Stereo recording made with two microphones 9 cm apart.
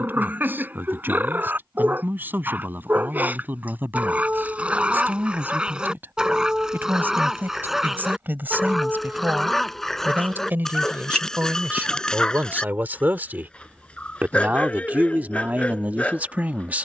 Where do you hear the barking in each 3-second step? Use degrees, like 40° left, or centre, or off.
20° right, 10° right, centre, centre, 10° left, 10° left.